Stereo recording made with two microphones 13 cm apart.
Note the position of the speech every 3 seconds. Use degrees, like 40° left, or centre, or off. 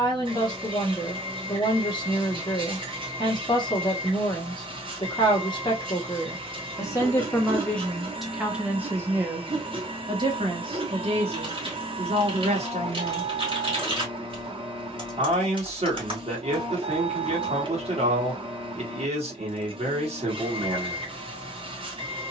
30° left, 30° left, 10° left, 40° right, 50° right, 50° right, 50° right, off.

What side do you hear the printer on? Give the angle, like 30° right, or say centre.
40° right.